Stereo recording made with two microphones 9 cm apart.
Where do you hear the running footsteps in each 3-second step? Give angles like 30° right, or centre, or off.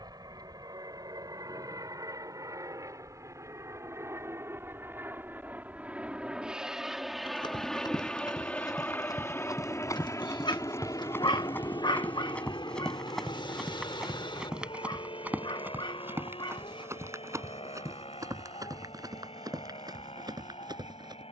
off, off, 50° left, 30° left, centre, 30° right, 40° right.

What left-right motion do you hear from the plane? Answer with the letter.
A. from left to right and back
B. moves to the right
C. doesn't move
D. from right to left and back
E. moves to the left
E.